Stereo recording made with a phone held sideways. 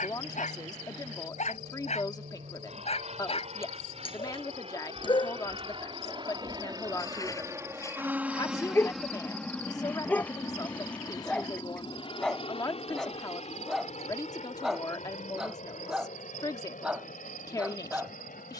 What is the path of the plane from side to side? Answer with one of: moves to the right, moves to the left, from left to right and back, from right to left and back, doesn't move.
moves to the left.